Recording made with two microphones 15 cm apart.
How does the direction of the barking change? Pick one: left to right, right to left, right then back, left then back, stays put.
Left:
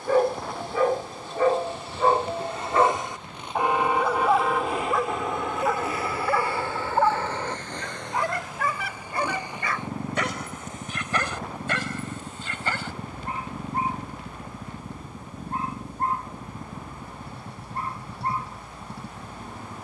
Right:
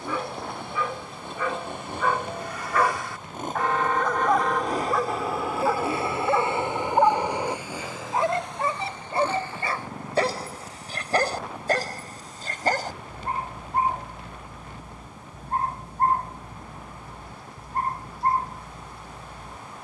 left to right.